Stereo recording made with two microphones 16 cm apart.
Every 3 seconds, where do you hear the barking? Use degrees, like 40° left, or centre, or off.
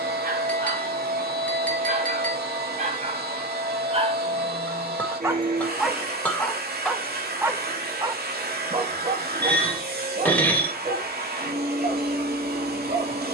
60° right, 30° right, 20° right, 50° right, 60° right.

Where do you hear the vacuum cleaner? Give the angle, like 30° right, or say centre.
80° right.